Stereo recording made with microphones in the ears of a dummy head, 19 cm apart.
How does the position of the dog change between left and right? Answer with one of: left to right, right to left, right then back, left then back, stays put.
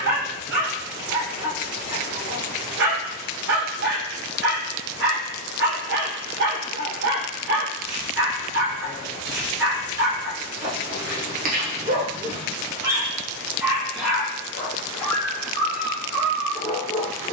right to left.